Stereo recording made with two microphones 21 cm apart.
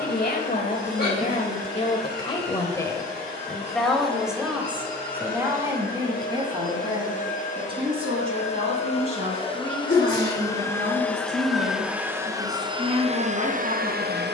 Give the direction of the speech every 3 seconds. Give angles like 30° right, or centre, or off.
30° left, 10° right, 20° right, 30° right, 30° right.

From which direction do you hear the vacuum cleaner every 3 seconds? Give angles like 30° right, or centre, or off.
50° left, 50° left, 40° left, 10° left, 30° right.